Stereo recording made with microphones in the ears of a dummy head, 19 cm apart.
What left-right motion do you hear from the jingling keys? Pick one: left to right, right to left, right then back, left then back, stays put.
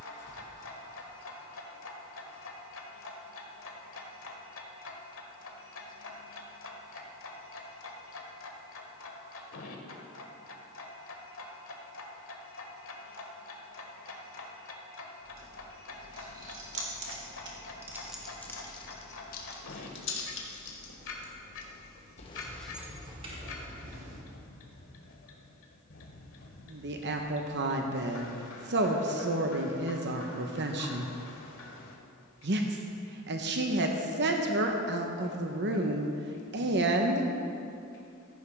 left then back.